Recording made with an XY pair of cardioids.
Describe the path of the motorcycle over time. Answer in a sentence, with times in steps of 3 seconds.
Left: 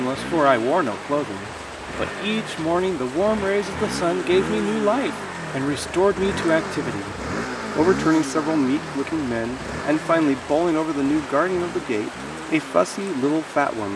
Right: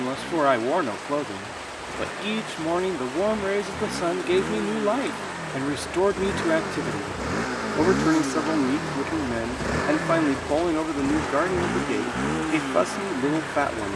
In this clip you hear the motorcycle on the left from 0 s, in the centre from 6 s and on the right from 9 s.